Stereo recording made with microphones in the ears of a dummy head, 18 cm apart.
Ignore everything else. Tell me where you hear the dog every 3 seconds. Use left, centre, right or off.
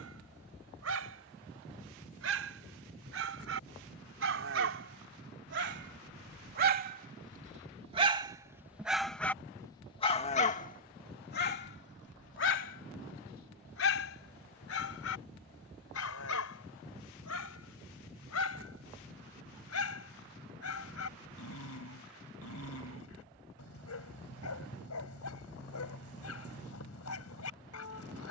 right, right, right, left, left, left, left, left, left, left.